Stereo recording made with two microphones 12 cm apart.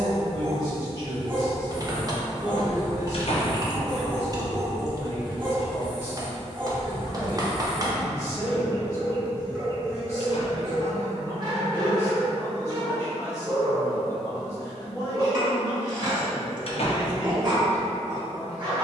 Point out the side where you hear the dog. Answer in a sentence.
You can hear the dog on the right.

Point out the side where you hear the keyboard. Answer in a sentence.
You can hear the keyboard on the right.